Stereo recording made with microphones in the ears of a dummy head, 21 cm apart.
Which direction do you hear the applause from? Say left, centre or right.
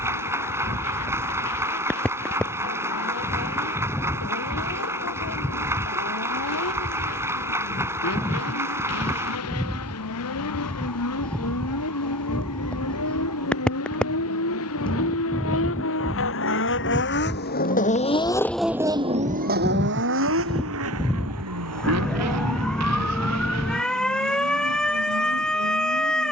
centre.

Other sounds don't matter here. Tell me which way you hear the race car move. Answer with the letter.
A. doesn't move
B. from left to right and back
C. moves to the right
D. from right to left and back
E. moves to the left
C.